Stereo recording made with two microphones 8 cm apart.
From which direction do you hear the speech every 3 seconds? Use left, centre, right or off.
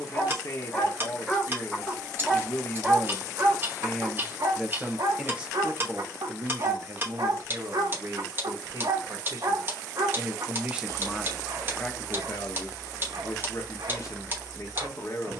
left, centre, right, right, left.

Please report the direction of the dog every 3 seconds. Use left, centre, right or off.
centre, right, right, right, right.